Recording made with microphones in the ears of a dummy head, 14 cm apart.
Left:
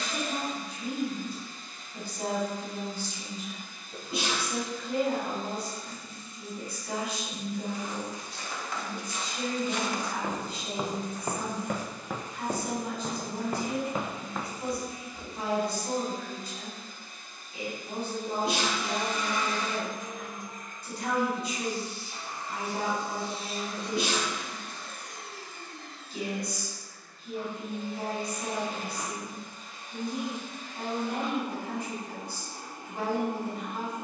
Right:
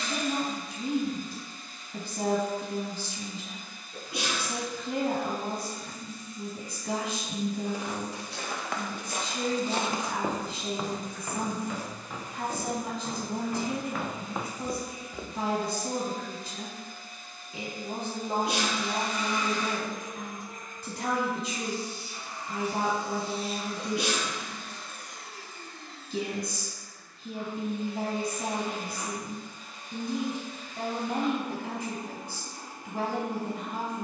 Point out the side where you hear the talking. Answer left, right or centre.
right.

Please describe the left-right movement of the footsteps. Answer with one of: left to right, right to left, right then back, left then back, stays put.
left then back.